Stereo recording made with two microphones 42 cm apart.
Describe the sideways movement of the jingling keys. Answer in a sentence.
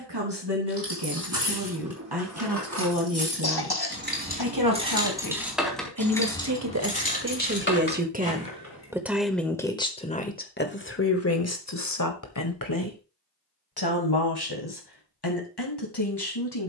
In this clip you hear the jingling keys travel towards the left.